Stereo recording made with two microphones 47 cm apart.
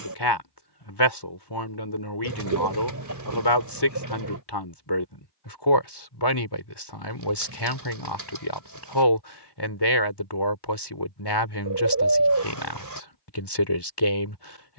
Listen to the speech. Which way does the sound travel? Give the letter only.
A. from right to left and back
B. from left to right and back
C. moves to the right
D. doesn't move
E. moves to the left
D.